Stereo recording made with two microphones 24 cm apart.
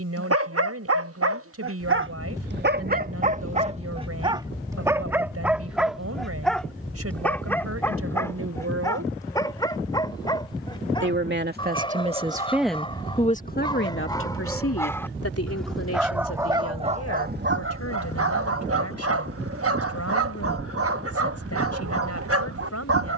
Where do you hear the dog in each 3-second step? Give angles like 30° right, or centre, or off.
60° right, 20° right, 10° left, 20° left, 20° left, 20° right, 70° right, 70° right.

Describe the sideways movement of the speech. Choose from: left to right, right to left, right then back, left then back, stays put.
right to left.